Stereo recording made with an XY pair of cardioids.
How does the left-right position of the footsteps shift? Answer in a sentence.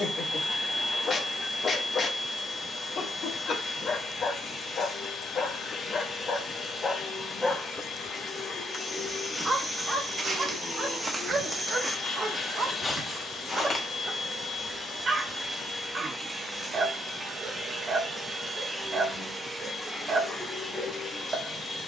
You can hear the footsteps go right and come back.